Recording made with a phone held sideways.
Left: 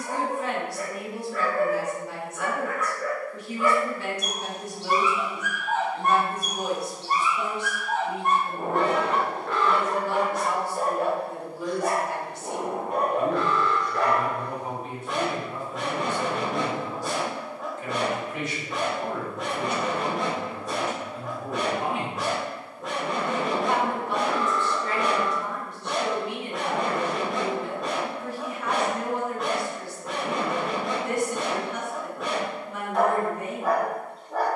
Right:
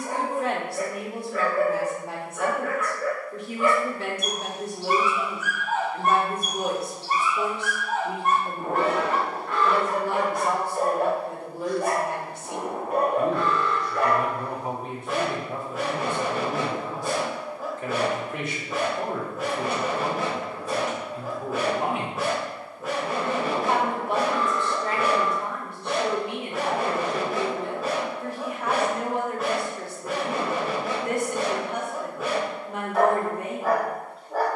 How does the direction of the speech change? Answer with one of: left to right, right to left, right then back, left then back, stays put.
stays put.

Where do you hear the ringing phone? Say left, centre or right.
left.